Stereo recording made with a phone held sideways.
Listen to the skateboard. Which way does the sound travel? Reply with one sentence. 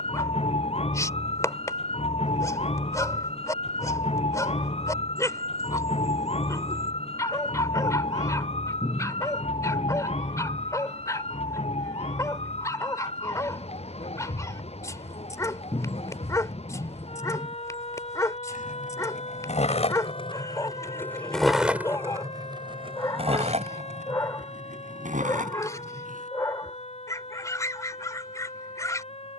In this clip you hear the skateboard travel towards the right.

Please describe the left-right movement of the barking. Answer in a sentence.
You can hear the barking stay put.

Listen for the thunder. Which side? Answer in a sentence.
You can hear the thunder on the left.